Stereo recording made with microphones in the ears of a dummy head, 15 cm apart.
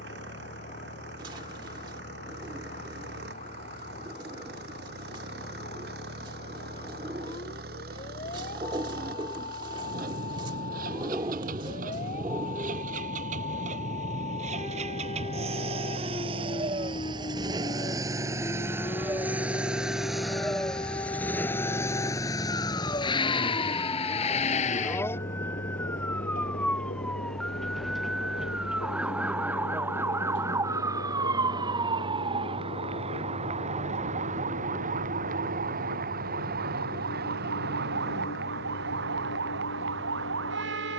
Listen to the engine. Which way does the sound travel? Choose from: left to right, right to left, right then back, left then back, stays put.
right to left.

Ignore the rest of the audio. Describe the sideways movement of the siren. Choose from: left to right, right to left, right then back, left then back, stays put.
left to right.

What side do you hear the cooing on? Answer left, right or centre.
right.